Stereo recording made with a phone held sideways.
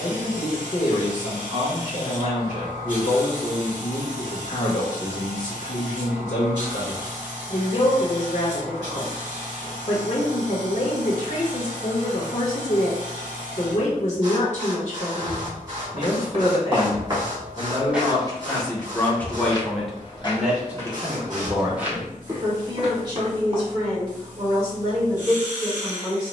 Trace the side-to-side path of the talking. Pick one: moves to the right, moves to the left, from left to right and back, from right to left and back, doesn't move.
moves to the right.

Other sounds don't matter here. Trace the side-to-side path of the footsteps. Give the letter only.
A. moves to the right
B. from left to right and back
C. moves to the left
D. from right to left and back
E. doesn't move
D.